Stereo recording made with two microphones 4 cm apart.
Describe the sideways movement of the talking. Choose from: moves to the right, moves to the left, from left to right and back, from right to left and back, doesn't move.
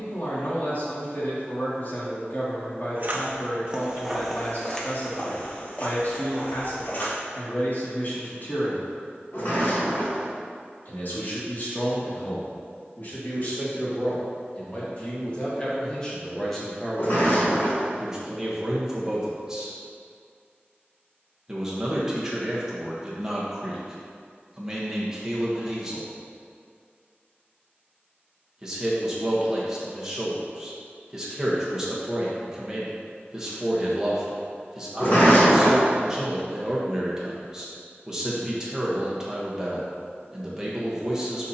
moves to the right.